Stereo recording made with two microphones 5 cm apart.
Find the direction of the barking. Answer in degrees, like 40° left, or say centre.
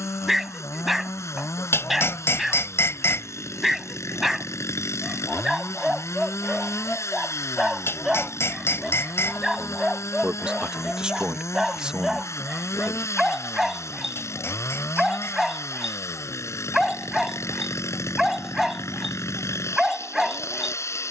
centre.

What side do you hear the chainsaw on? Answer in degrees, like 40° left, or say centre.
80° left.